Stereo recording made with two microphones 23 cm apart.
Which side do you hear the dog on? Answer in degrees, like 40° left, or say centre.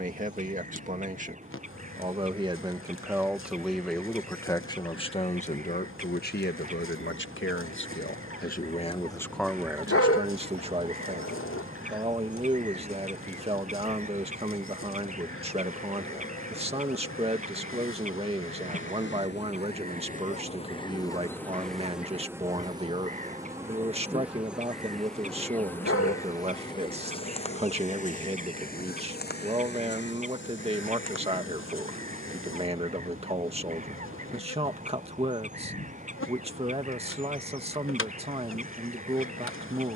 80° left.